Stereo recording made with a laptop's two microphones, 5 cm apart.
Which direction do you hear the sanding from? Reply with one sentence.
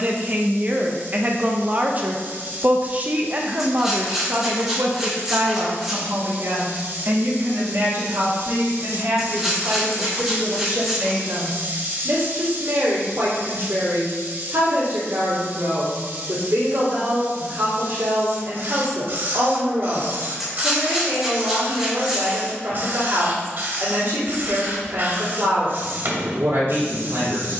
In this clip you hear the sanding in the centre.